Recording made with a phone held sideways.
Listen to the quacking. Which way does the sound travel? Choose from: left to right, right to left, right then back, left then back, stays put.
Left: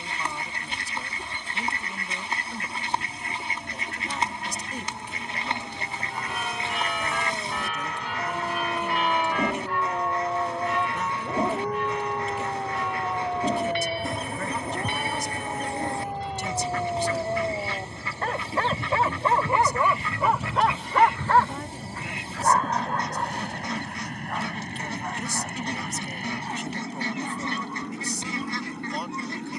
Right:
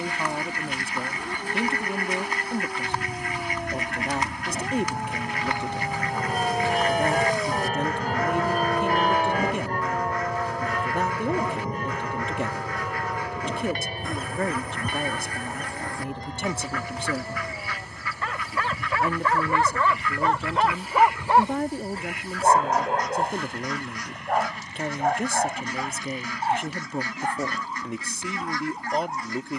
stays put.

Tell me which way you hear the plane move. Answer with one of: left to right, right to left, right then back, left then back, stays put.
right to left.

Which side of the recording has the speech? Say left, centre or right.
right.